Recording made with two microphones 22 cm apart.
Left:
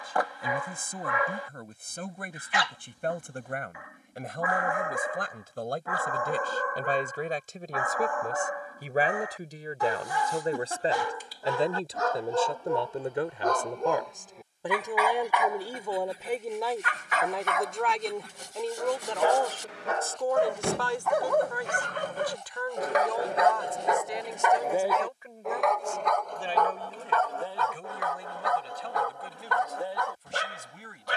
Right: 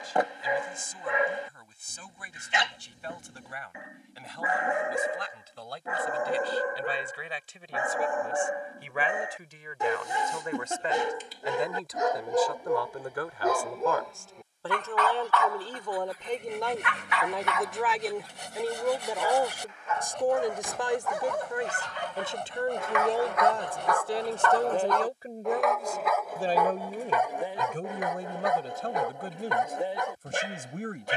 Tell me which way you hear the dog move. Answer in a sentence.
You can hear the dog go left and come back.